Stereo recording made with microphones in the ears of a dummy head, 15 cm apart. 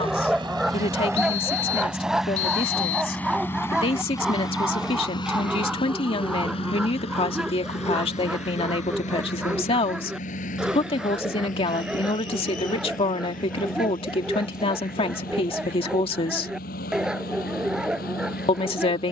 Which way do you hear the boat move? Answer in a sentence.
You can hear the boat move from right to left.